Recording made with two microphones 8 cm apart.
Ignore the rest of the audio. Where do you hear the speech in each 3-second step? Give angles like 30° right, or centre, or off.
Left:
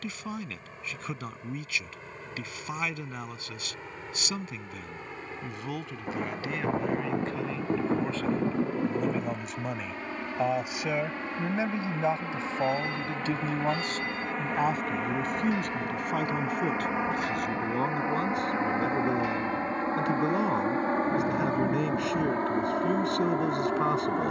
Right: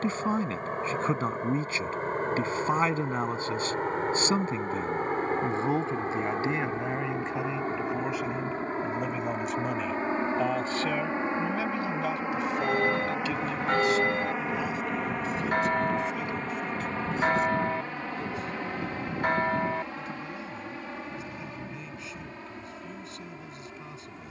40° right, 40° right, 20° right, 10° left, 40° left, 60° left, 70° left, 70° left.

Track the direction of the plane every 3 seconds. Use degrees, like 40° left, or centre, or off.
60° right, 50° right, 40° right, 30° right, 10° right, 10° left, 30° left, 50° left.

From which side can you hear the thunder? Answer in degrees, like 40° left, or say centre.
50° left.